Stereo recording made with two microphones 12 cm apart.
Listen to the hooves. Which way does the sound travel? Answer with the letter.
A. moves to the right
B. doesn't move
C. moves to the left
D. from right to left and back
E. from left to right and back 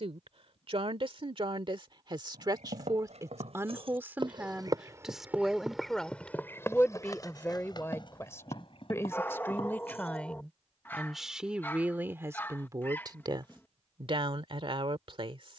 C.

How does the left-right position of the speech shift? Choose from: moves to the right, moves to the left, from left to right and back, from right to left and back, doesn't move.
from right to left and back.